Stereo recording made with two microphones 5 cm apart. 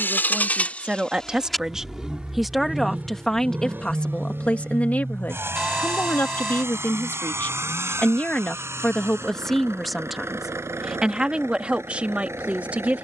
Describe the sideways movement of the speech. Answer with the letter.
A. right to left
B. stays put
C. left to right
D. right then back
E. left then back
E.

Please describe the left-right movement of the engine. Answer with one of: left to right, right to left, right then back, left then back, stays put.
left to right.